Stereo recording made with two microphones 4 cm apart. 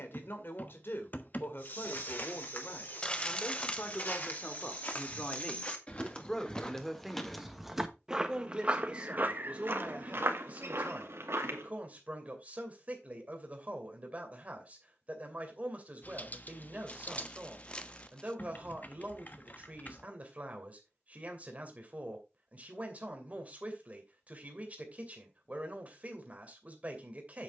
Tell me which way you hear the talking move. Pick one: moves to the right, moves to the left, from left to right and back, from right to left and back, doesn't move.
moves to the right.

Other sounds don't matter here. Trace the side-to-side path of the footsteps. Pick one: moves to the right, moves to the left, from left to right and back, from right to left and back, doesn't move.
moves to the right.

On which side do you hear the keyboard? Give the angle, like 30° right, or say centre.
40° left.